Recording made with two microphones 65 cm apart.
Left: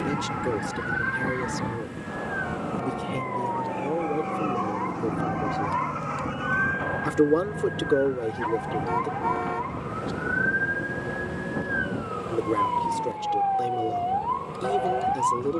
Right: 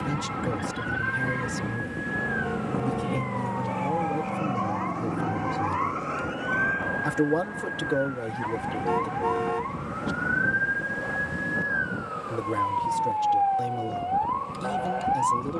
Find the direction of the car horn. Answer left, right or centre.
right.